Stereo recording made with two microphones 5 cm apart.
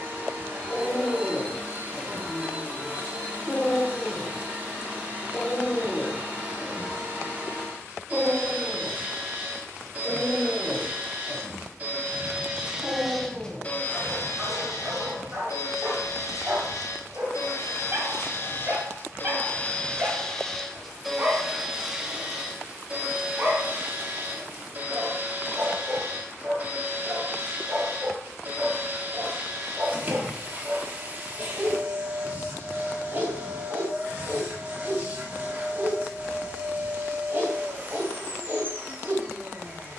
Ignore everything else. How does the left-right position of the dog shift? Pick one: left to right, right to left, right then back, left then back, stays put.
left to right.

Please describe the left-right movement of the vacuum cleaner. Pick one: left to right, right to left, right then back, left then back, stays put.
left then back.